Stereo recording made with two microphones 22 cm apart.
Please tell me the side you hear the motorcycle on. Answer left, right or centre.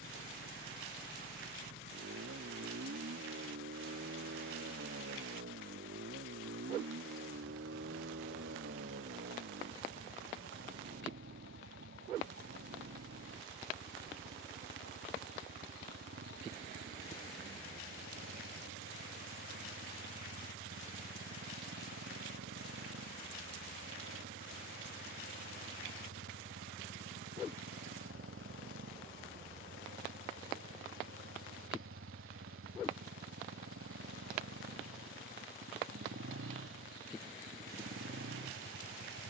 right.